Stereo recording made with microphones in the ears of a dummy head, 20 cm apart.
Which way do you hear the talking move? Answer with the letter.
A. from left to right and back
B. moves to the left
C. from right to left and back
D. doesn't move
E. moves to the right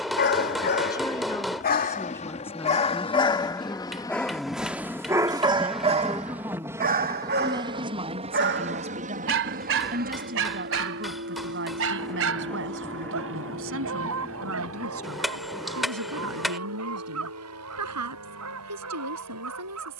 E.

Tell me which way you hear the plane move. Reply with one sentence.
In this clip you hear the plane move to the right.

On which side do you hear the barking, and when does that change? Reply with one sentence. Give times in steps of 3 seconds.
In this clip you hear the barking on the left from 0 s, in the centre from 3 s and on the right from 6 s.